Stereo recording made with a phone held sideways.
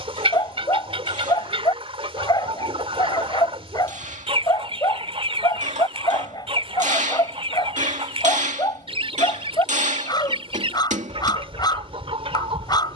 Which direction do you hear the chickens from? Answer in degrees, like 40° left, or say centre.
40° right.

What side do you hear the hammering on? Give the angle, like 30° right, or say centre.
50° right.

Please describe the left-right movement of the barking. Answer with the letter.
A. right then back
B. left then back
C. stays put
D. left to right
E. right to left
C.